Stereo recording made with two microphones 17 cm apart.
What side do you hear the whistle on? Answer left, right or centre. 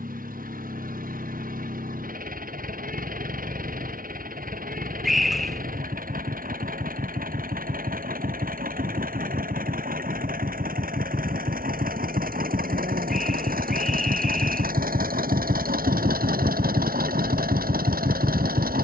centre.